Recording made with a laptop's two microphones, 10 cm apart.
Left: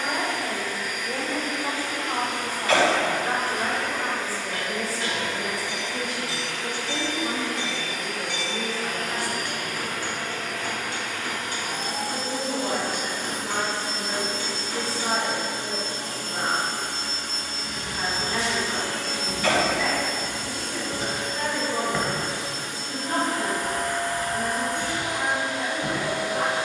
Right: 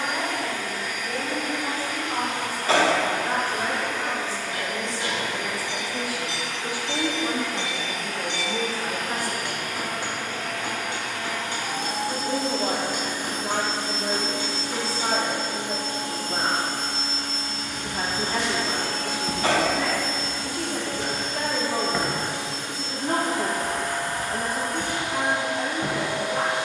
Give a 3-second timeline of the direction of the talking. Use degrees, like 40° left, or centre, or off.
20° left, 10° left, 20° right, 50° right, 70° right, 70° right, 70° right, 70° right, 70° right.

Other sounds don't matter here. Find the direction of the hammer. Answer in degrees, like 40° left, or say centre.
20° right.